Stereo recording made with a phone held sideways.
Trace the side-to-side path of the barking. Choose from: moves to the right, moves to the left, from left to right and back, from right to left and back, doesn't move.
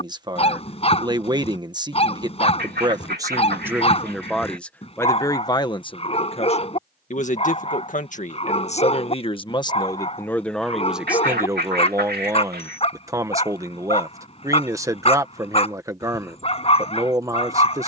doesn't move.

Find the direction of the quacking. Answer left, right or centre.
right.